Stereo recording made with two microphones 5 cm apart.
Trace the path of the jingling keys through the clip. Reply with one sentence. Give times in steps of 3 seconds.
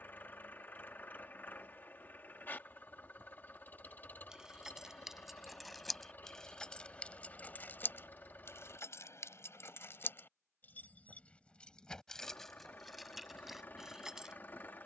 You can hear the jingling keys not at all from 0 s, in the centre from 3 s, on the left from 6 s and in the centre from 12 s.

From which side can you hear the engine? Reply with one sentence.
You can hear the engine on the left.